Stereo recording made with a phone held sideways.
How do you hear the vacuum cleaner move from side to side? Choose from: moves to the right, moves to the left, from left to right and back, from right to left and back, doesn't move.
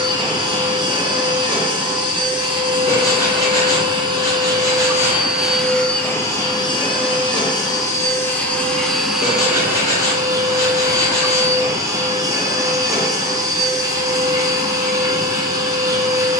from right to left and back.